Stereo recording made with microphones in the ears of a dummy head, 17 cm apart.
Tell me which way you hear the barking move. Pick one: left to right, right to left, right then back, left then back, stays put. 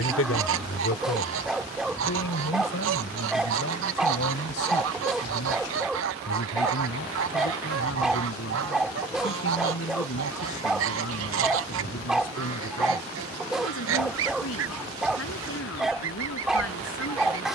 stays put.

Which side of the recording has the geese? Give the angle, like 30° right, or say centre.
80° right.